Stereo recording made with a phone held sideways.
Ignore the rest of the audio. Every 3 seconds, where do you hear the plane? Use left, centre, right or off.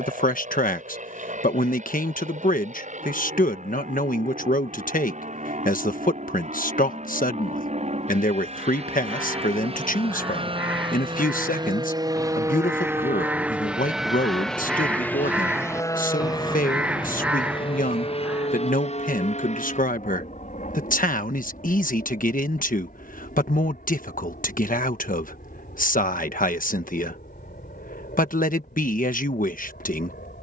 right, right, right, right, centre, left, left, left, left, left.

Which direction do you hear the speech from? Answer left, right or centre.
left.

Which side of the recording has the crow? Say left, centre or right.
centre.